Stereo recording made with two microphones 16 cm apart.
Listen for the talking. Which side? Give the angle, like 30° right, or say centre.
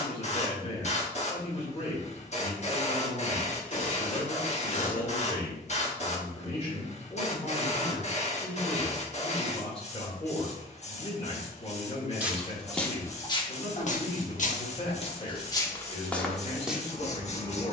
40° left.